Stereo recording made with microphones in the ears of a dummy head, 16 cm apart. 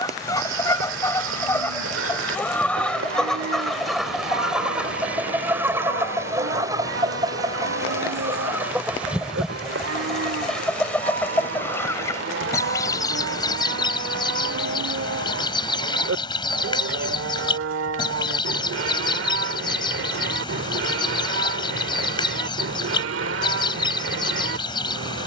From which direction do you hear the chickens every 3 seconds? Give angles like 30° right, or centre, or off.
10° left, centre, 20° right, centre, 20° left, 30° left, 30° left, 30° left, 30° left.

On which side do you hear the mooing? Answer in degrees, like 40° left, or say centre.
90° right.